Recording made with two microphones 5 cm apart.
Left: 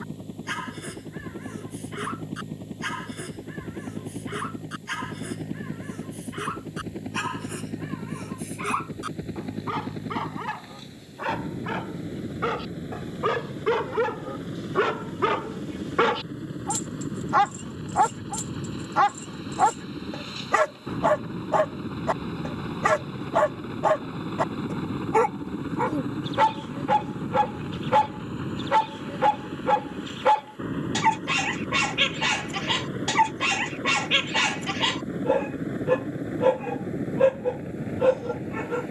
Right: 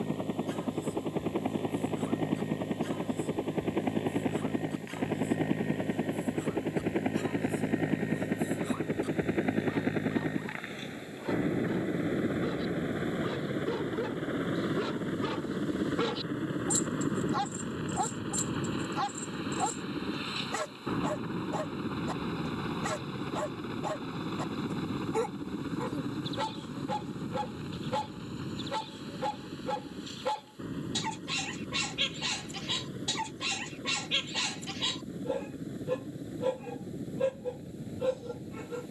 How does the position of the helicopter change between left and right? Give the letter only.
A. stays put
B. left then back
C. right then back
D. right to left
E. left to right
D.